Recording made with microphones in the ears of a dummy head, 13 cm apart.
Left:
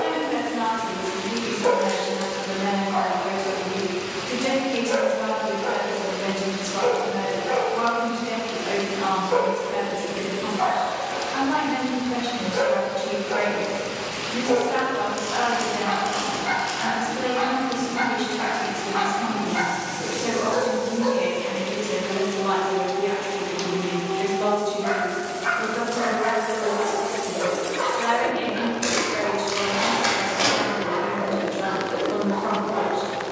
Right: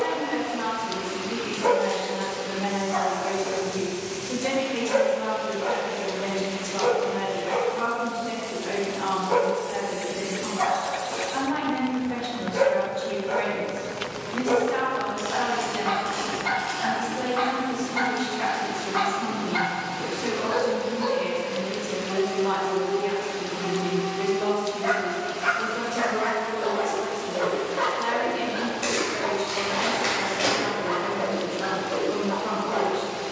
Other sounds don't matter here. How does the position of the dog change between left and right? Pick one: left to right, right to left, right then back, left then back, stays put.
stays put.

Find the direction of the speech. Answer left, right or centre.
centre.